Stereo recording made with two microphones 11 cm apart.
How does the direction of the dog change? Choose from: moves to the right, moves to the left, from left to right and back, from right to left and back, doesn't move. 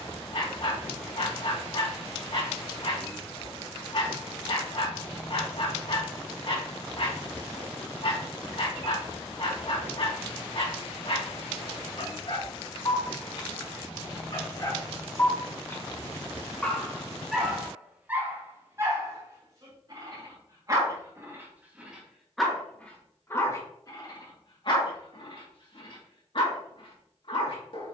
from left to right and back.